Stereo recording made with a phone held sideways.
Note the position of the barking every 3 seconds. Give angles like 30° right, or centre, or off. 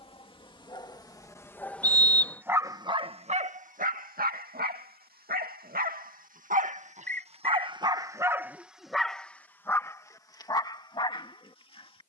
10° left, 60° right, 30° right, 20° left.